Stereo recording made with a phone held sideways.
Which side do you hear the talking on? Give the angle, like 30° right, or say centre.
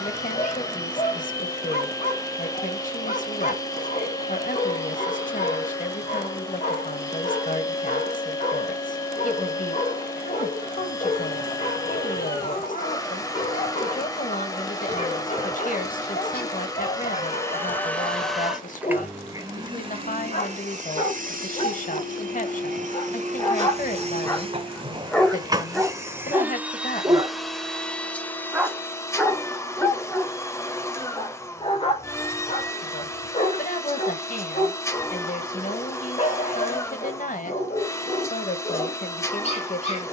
50° left.